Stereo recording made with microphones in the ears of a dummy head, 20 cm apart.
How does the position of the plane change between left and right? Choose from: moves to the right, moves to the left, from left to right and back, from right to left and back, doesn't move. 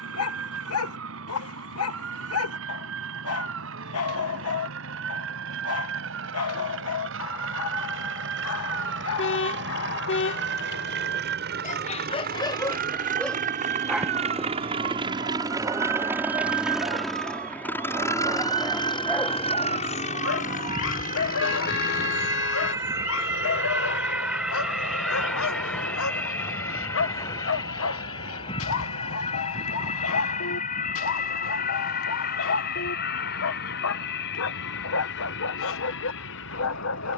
moves to the left.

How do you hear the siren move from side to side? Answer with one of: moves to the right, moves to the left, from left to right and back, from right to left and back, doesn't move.
moves to the left.